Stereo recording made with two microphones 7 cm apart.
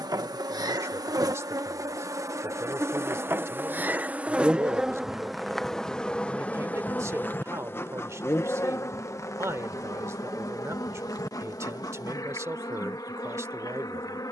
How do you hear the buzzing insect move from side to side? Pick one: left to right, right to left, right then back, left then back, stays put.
right to left.